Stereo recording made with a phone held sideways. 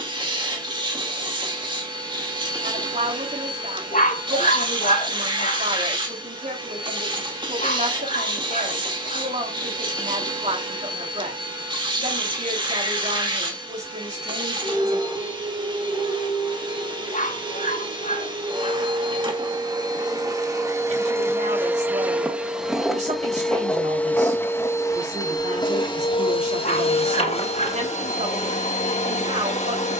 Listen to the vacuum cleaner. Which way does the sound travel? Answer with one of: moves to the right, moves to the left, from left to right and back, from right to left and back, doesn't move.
moves to the left.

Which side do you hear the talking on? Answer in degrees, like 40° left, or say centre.
60° right.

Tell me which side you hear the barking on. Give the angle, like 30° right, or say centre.
60° left.